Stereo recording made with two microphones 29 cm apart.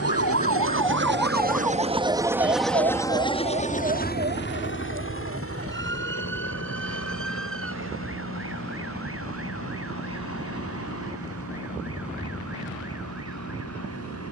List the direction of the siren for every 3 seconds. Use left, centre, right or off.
centre, right, right, right, right.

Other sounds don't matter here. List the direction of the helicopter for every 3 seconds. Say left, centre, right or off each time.
right, left, left, left, left.